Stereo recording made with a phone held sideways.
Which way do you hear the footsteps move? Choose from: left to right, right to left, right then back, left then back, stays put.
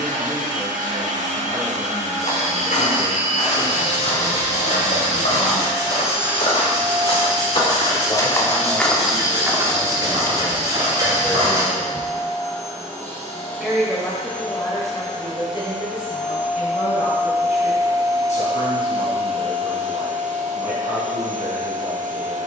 left to right.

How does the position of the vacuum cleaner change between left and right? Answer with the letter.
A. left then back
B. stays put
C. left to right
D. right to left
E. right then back
A.